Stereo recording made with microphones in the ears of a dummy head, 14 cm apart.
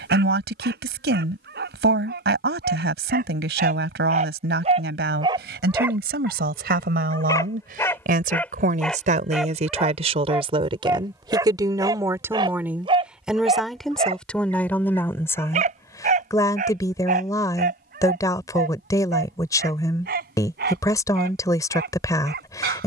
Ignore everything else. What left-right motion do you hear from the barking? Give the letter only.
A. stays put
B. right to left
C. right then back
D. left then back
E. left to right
D.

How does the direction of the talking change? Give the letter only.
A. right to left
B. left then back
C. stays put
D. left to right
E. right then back
A.